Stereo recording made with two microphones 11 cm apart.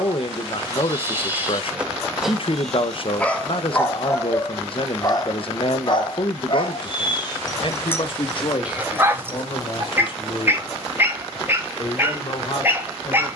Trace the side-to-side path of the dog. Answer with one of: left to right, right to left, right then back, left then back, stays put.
left then back.